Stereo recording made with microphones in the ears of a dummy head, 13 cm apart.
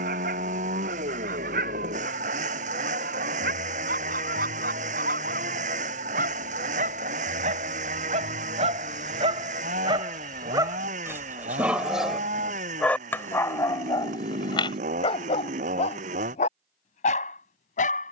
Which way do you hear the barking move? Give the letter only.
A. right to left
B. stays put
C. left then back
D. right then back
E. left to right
A.